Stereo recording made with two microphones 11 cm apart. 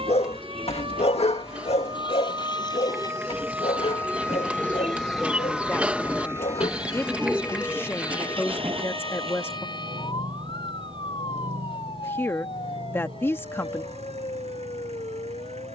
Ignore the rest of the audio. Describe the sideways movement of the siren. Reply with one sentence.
In this clip you hear the siren move to the left.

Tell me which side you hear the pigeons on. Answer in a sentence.
You can hear the pigeons in the centre.